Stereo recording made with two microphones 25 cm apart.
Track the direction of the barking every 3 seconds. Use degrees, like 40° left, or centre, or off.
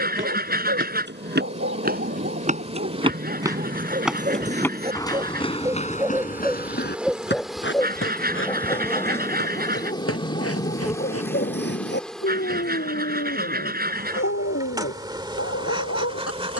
50° right, 30° right, 10° left, 30° left, 50° left, 60° left.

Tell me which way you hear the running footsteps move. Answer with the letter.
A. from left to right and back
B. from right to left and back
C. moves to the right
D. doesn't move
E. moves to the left
E.